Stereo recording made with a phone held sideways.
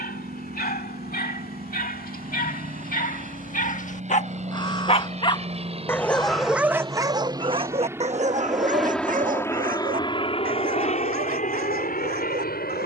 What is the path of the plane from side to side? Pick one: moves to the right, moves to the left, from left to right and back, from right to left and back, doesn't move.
moves to the left.